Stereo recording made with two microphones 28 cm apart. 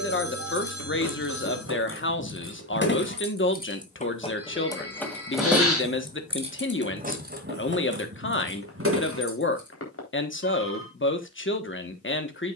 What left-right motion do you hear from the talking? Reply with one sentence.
In this clip you hear the talking stay in one place.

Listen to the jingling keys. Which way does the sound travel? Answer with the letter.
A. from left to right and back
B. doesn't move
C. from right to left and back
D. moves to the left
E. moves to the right
E.